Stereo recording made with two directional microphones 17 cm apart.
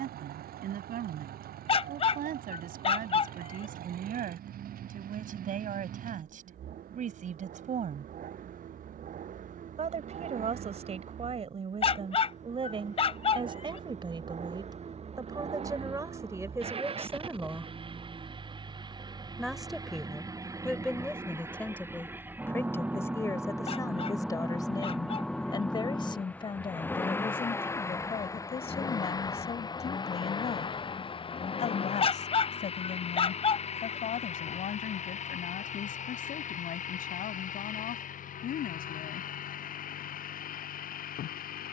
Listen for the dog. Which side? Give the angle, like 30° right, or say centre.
30° left.